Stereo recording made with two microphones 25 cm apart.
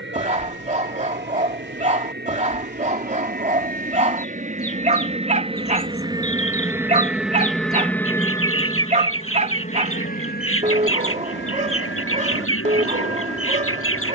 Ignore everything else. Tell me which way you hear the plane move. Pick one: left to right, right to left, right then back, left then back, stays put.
right to left.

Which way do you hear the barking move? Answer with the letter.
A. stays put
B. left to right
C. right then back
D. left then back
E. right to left
A.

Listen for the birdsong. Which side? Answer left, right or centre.
left.